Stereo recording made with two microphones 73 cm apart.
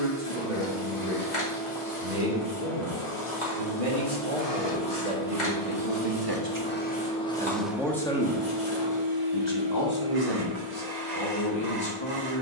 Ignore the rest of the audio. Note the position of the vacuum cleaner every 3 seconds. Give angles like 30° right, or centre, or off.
40° left, 30° left, centre, 50° right.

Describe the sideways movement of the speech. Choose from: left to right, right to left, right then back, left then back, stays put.
right to left.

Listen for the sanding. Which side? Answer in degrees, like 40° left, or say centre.
70° left.